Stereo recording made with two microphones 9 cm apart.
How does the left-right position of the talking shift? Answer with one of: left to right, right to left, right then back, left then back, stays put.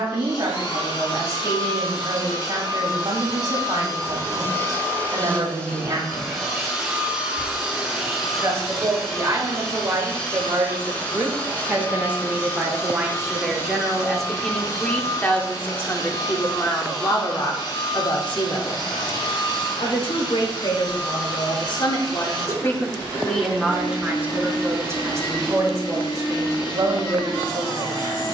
left then back.